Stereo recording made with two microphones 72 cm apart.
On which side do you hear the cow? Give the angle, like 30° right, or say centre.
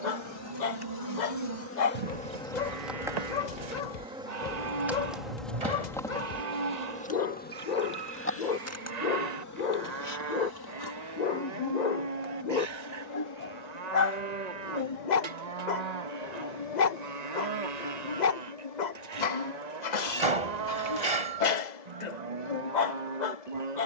70° right.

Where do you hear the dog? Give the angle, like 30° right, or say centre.
70° left.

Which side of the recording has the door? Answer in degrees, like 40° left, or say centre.
50° right.